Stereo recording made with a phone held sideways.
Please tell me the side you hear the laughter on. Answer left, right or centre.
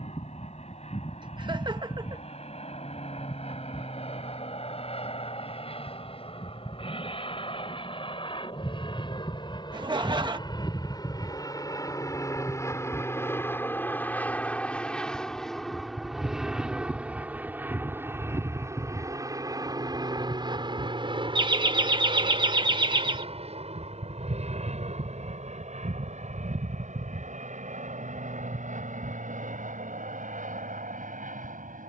right.